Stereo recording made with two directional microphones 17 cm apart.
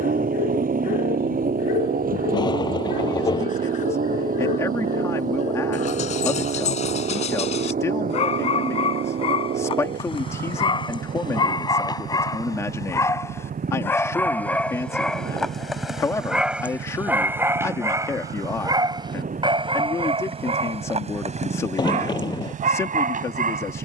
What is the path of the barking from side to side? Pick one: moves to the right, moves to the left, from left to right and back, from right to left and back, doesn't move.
moves to the right.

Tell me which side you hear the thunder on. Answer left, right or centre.
left.